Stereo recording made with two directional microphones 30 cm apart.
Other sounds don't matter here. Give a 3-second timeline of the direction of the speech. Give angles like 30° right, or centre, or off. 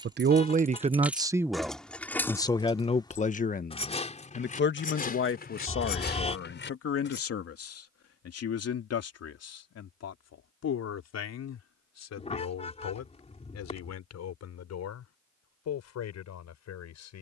10° right, 40° left, 50° left, 60° left, 60° left, 60° left.